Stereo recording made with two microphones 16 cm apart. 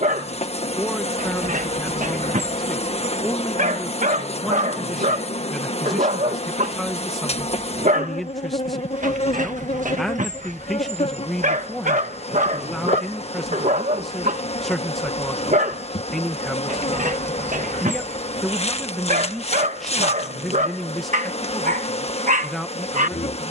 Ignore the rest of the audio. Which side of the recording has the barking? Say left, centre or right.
right.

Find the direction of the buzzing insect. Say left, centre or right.
left.